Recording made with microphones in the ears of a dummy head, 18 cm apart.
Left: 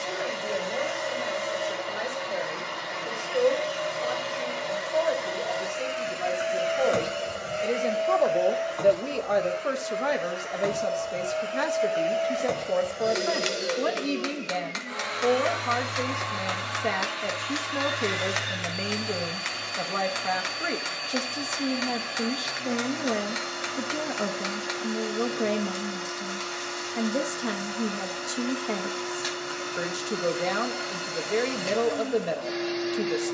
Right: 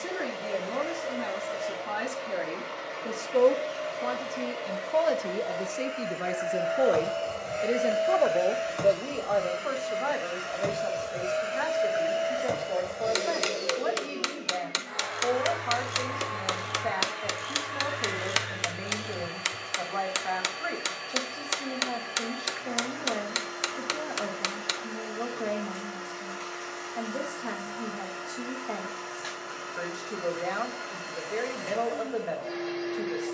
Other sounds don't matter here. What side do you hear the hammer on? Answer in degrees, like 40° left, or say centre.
40° right.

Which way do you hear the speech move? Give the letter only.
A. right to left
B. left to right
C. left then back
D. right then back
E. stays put
A.